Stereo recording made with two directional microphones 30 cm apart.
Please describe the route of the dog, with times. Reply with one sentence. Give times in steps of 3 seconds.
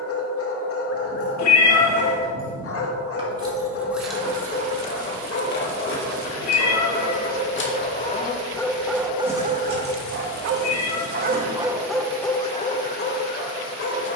You can hear the dog on the left from 0 s, on the right from 9 s and on the left from 12 s.